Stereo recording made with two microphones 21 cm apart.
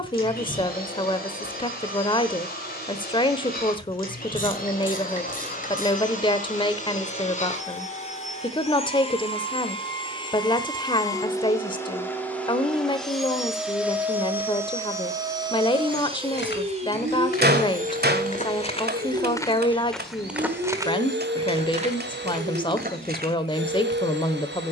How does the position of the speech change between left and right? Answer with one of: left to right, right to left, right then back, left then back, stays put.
stays put.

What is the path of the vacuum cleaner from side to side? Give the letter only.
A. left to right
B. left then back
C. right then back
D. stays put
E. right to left
A.